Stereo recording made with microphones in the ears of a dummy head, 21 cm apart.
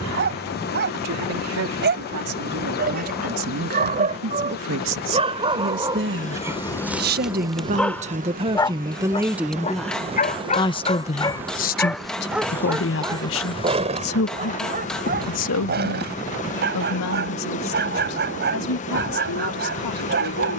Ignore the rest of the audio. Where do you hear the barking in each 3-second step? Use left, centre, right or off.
right, right, centre, left, right, right, right.